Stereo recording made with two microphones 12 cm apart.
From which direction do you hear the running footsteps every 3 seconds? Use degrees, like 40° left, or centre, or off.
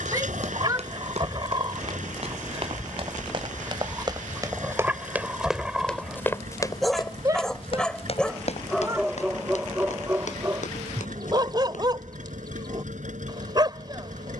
60° right, 20° right, 40° left, 70° left, off.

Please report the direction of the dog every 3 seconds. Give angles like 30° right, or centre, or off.
40° right, 10° right, centre, 20° right, 40° right.